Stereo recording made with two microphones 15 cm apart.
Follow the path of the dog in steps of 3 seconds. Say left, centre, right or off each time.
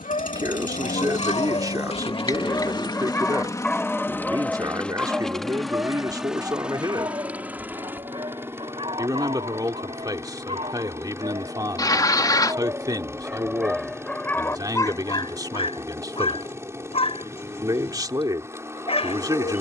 left, centre, right, right, centre, left, left.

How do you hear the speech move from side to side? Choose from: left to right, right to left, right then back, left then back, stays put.
stays put.